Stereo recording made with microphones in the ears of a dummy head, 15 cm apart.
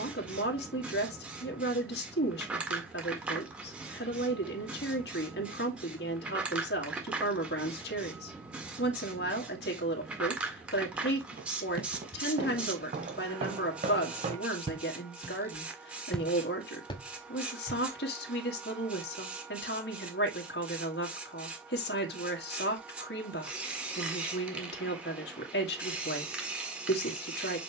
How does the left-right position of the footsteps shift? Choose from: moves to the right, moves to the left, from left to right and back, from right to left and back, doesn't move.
moves to the left.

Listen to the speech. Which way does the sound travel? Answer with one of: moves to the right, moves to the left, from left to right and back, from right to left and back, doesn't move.
doesn't move.